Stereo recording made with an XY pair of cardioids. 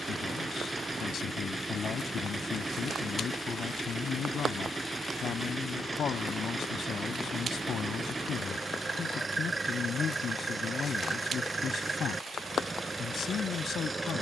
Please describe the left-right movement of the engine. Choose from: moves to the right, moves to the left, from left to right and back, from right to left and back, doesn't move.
doesn't move.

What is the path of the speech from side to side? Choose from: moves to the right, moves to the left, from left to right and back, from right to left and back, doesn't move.
doesn't move.